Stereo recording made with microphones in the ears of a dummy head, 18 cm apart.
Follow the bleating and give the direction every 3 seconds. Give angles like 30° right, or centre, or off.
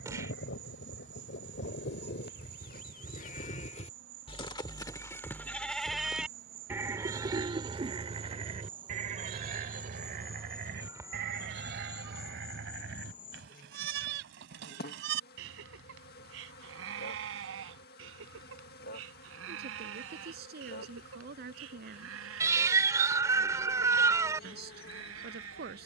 50° left, 20° left, 20° right, 50° right, 60° right, 70° right, 70° right, 70° right, 70° right.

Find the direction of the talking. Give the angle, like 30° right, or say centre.
50° right.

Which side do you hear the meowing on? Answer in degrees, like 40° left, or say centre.
20° right.